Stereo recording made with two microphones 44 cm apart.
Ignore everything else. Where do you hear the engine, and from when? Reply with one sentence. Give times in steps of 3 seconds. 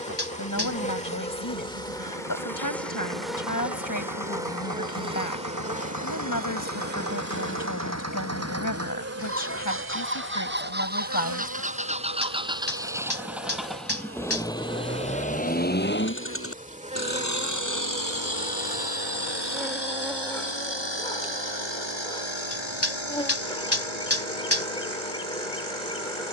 In this clip you hear the engine on the right from 0 s, in the centre from 12 s and on the left from 15 s.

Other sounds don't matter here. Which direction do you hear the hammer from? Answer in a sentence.
In this clip you hear the hammer on the left.